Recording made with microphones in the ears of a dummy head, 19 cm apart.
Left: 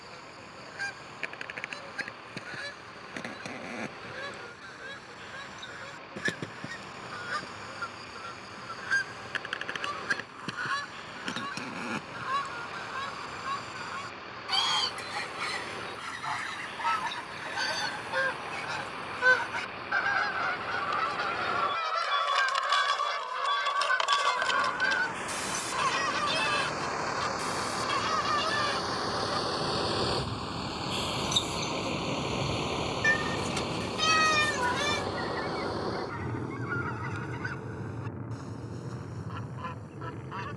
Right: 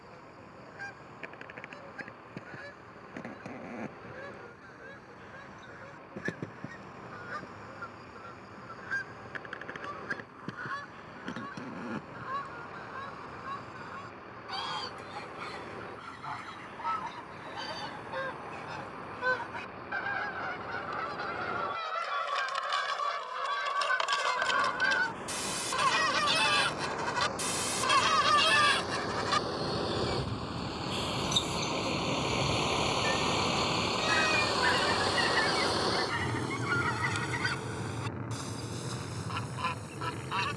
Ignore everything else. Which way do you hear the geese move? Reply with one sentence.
In this clip you hear the geese go from the left side to the right.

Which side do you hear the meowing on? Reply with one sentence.
You can hear the meowing on the left.